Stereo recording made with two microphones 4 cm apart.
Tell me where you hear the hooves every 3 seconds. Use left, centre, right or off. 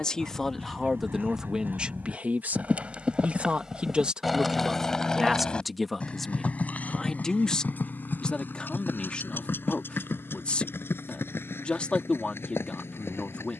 right, centre, left, left, left.